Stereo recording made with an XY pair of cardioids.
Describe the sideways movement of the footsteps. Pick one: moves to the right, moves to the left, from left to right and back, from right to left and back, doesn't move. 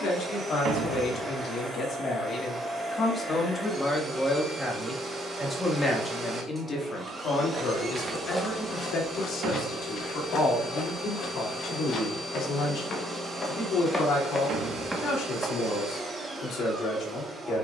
from right to left and back.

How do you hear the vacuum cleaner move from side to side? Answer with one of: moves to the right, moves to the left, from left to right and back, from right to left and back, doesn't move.
doesn't move.